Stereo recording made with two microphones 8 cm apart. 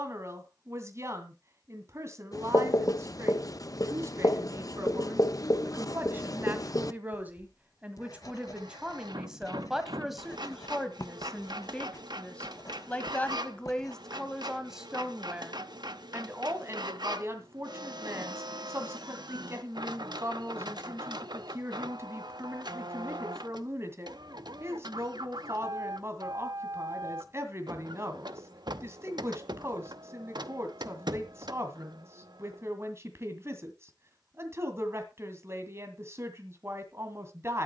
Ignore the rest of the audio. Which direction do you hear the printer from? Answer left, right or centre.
right.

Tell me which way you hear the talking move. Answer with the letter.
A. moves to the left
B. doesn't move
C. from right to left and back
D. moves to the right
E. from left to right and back
C.